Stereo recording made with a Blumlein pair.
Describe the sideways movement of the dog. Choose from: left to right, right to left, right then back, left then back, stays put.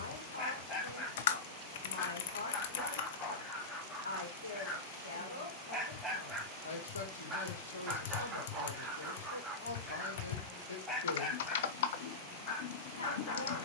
right then back.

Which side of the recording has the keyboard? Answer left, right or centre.
left.